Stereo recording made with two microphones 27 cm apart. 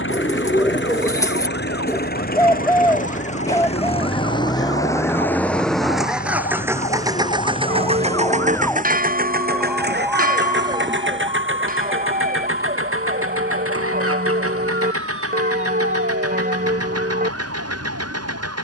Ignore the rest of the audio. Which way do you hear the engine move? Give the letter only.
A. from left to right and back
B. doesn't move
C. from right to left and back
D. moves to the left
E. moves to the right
E.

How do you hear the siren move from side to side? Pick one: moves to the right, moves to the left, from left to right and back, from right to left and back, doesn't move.
moves to the right.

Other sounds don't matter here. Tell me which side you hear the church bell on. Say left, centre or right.
right.